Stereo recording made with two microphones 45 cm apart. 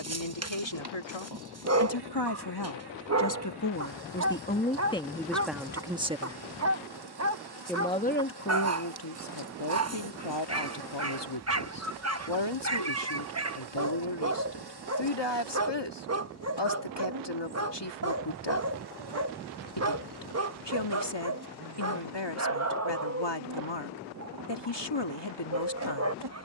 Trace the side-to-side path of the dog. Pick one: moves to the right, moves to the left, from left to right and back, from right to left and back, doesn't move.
doesn't move.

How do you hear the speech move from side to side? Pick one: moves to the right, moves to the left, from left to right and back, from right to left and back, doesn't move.
from left to right and back.